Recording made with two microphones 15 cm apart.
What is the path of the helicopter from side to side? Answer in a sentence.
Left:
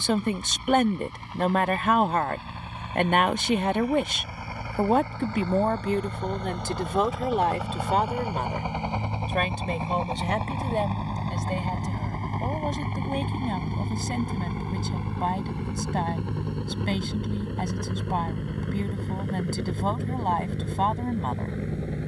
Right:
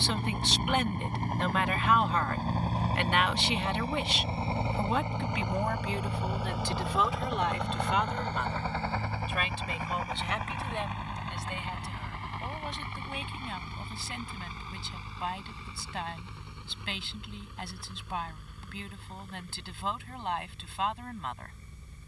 In this clip you hear the helicopter move from right to left.